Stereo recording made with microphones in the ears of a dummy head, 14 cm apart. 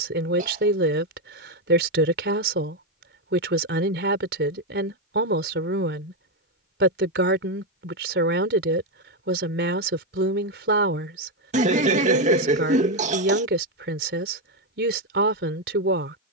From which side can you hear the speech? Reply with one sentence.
You can hear the speech on the right.